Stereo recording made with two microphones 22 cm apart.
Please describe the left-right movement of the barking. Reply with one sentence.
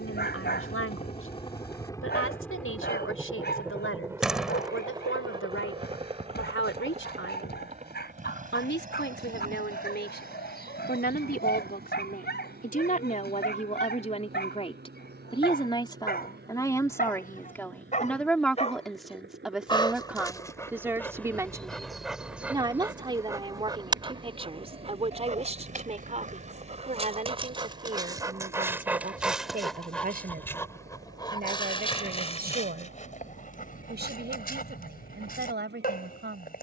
You can hear the barking go right and come back.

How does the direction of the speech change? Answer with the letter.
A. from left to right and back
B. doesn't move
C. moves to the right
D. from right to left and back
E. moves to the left
C.